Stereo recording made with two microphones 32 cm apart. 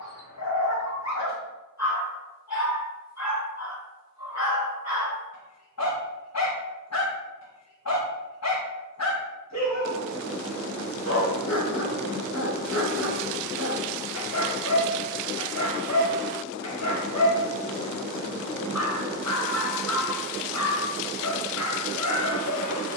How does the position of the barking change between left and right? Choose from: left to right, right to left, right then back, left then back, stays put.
stays put.